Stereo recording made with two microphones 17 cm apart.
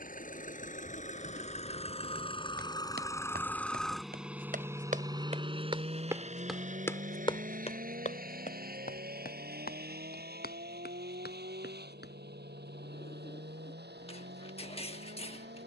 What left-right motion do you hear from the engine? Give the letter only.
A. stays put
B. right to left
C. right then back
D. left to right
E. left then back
D.